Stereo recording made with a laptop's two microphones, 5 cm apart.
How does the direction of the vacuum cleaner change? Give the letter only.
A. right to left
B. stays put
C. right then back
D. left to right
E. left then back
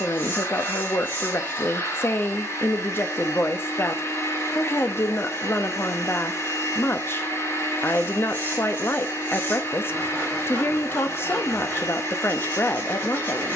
B.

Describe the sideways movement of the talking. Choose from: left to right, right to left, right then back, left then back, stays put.
stays put.